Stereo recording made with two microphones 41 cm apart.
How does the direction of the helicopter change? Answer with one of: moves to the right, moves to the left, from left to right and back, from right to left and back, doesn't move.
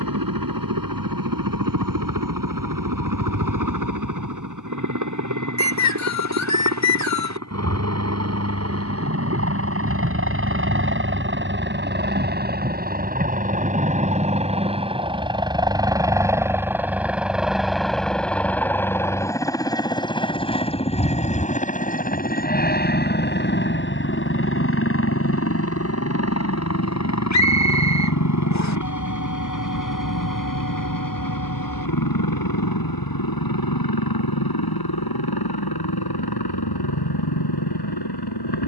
moves to the left.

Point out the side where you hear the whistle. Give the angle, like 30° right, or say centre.
40° left.